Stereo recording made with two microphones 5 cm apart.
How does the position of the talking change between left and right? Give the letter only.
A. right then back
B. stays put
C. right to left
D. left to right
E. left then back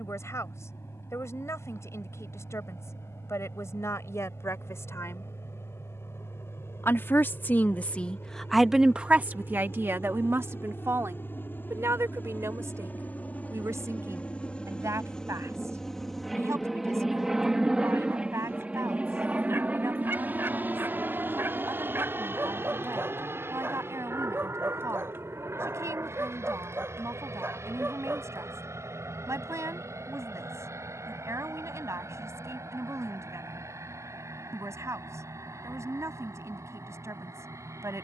D.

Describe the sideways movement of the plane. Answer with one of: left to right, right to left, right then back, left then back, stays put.
left to right.